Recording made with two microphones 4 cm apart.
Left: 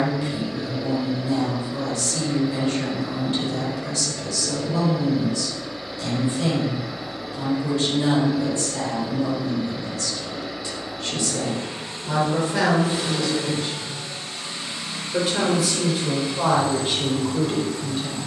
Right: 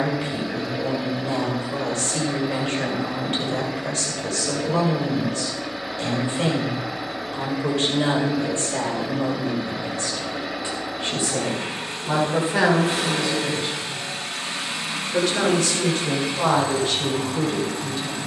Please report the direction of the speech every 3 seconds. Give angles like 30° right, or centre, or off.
40° right, 40° right, 40° right, 30° right, 10° right, 10° left.